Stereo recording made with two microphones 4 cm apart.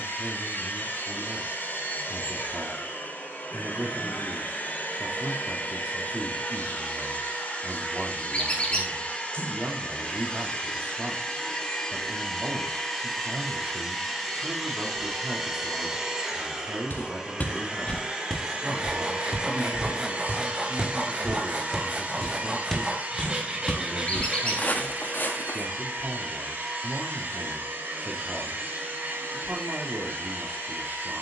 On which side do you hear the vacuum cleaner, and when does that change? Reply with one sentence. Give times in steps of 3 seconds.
In this clip you hear the vacuum cleaner on the left from 0 s, in the centre from 12 s and on the right from 18 s.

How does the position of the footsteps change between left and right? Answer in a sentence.
In this clip you hear the footsteps go right and come back.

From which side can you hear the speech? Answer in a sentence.
You can hear the speech on the right.